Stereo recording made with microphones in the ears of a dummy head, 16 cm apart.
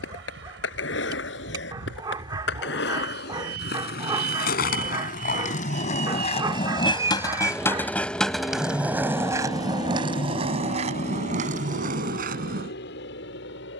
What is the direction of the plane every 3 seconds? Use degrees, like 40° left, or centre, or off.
70° right, 50° right, 10° right, 40° left, 60° left.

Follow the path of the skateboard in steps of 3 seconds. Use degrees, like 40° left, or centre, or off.
70° left, 50° left, 20° left, 30° right, 50° right.